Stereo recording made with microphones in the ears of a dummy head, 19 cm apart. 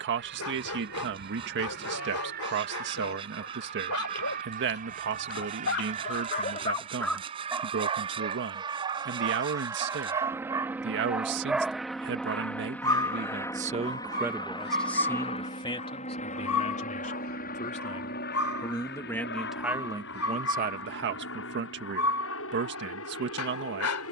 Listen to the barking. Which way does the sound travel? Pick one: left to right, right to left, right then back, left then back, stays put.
right then back.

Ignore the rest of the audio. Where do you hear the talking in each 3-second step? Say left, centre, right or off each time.
right, right, right, right, right, left, centre, right.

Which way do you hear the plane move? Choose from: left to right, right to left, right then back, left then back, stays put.
right to left.